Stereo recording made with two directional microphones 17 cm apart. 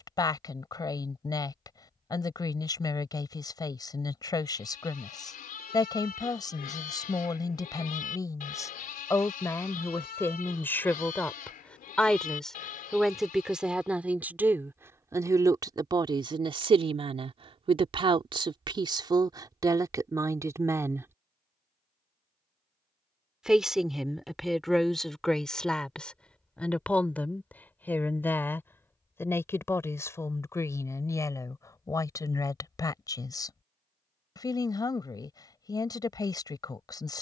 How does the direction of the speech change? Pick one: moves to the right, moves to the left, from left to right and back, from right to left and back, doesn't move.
from left to right and back.